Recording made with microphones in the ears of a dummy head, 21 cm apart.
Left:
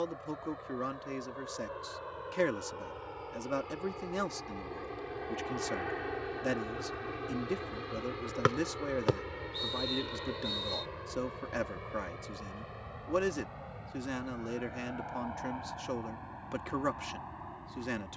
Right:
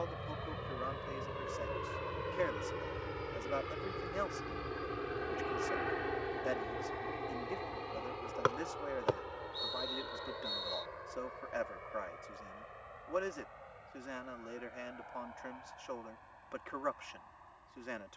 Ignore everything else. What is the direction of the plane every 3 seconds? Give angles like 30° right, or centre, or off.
40° right, 20° right, 20° left, 40° left, 60° left, 70° left.